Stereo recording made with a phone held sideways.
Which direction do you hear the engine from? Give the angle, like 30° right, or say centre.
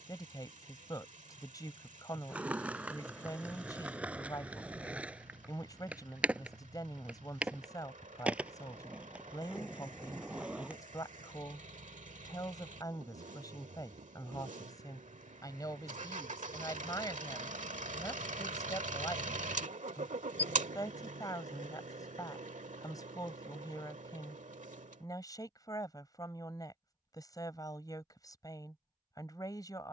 60° right.